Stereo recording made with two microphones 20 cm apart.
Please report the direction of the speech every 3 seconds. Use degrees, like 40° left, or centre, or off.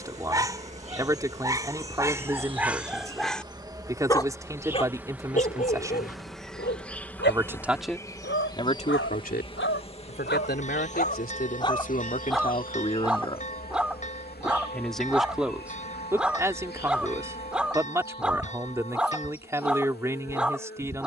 20° right, 20° right, centre, 50° left, 20° left, 10° right, 10° right.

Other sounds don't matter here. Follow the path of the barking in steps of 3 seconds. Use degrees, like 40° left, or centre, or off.
10° right, 30° left, 60° left, 50° left, centre, centre, centre.